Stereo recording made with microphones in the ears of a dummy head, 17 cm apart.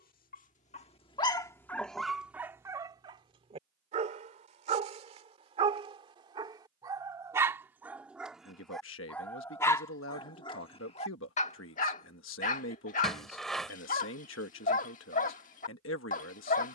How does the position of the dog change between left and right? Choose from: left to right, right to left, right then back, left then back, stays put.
right then back.